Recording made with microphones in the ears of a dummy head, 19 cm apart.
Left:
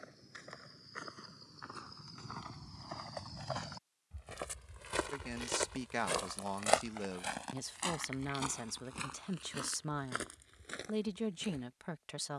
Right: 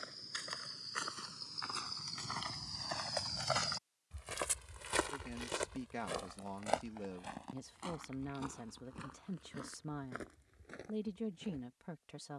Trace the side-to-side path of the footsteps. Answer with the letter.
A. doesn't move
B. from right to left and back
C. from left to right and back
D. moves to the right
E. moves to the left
E.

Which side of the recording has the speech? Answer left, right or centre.
left.